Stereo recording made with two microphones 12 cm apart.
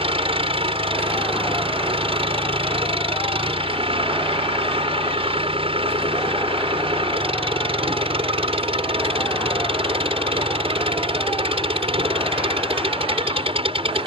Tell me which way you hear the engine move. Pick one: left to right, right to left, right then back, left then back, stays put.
stays put.